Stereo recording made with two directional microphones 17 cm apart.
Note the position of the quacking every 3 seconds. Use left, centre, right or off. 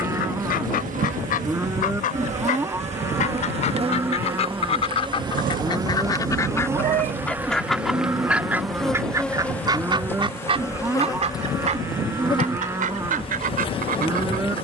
left, left, centre, right, right.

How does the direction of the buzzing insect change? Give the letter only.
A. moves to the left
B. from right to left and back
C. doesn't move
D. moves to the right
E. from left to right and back
A.